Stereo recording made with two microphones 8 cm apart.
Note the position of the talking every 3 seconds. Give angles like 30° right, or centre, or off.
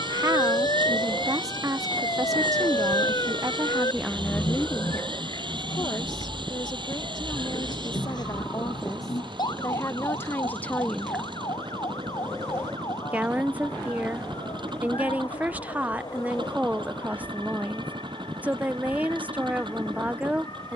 40° right, centre, 50° left, 20° left, 20° right, 20° right, 20° right.